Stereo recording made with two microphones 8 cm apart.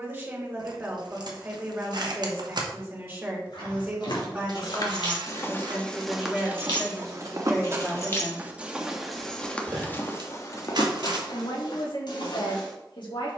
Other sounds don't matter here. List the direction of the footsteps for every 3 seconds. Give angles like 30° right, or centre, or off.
off, 50° left, 20° right, 30° left, 70° left.